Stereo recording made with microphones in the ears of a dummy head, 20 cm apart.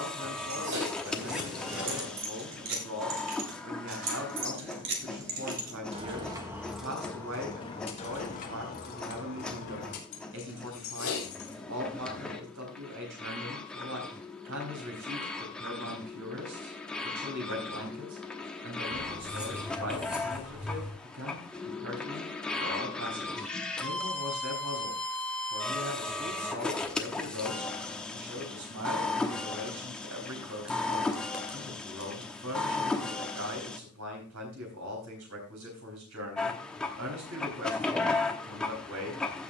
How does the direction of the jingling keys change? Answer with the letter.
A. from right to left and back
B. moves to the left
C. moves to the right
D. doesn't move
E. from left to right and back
B.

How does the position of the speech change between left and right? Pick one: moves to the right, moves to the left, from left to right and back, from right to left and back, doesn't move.
doesn't move.